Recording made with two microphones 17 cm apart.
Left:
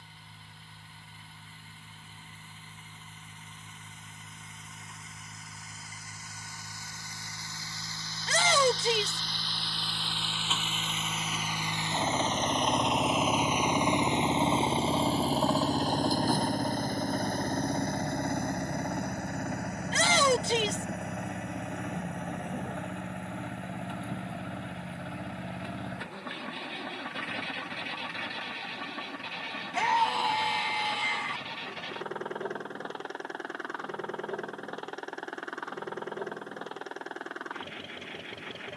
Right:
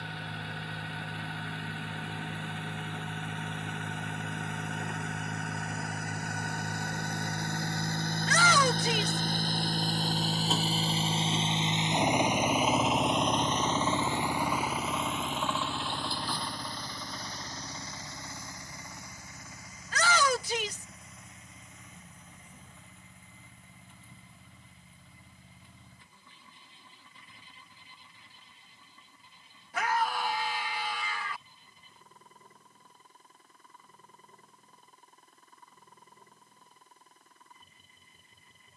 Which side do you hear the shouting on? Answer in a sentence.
In this clip you hear the shouting on the left.